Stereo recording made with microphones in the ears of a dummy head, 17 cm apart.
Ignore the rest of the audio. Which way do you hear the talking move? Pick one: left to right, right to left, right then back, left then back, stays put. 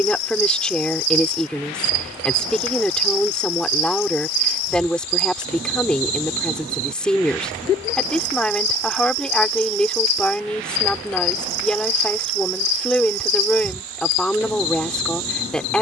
stays put.